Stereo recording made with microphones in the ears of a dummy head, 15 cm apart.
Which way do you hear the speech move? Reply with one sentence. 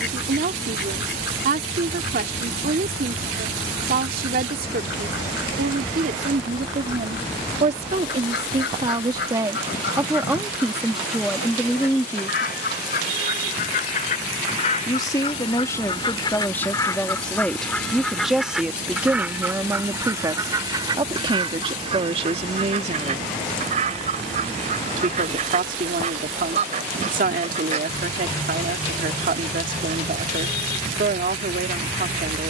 You can hear the speech move from right to left and back again.